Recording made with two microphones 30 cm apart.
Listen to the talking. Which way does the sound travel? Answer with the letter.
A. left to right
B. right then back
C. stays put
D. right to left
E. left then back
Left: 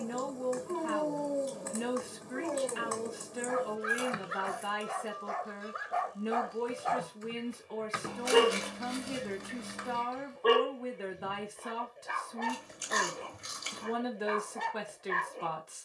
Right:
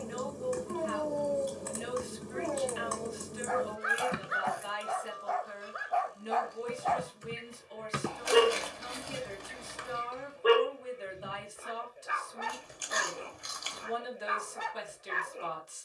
C.